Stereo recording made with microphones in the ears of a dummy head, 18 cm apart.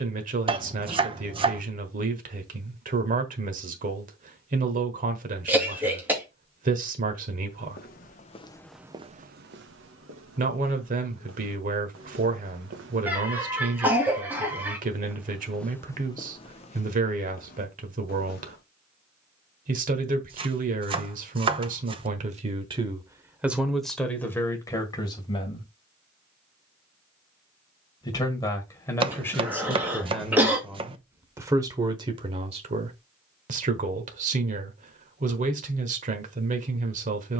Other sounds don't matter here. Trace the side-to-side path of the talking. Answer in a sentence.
You can hear the talking go left and come back.